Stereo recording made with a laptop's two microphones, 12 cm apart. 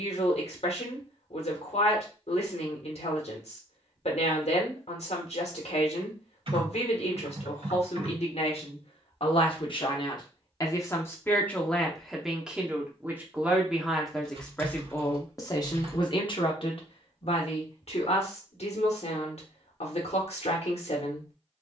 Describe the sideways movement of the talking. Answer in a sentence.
You can hear the talking go right and come back.